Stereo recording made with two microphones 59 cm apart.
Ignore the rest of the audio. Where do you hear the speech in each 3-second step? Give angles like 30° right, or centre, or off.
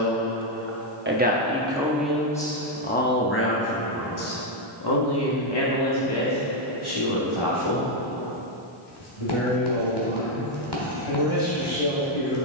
10° right, 30° left, 50° left, 70° left.